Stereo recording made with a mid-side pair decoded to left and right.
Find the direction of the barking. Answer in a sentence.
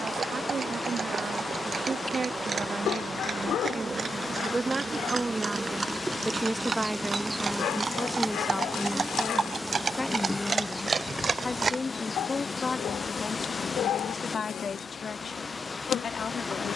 In this clip you hear the barking on the left.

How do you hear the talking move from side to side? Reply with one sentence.
In this clip you hear the talking move to the left.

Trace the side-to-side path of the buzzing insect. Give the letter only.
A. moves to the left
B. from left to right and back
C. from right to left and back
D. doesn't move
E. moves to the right
A.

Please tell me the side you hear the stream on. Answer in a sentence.
In this clip you hear the stream on the left.